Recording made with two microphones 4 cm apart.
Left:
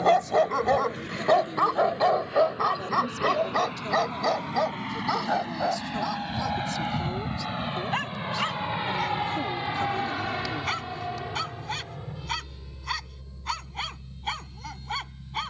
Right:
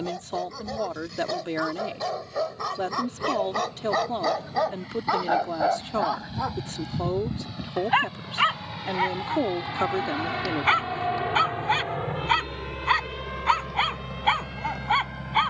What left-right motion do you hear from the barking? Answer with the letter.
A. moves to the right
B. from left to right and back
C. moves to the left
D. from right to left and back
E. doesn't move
A.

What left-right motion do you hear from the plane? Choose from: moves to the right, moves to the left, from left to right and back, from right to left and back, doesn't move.
moves to the right.